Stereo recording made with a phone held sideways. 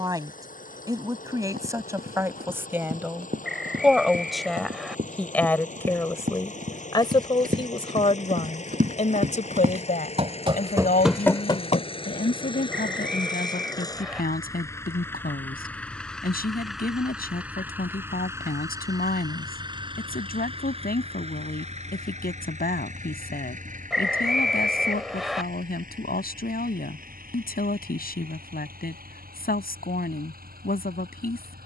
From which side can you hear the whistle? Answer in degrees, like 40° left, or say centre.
centre.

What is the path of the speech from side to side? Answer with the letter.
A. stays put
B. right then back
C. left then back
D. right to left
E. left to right
D.